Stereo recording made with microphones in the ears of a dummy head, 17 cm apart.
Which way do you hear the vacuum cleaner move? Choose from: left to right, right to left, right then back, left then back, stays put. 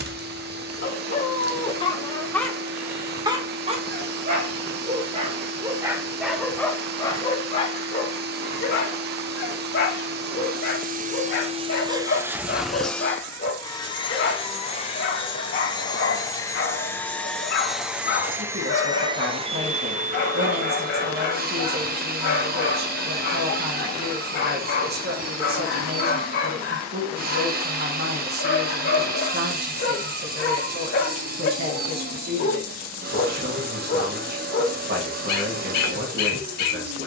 left then back.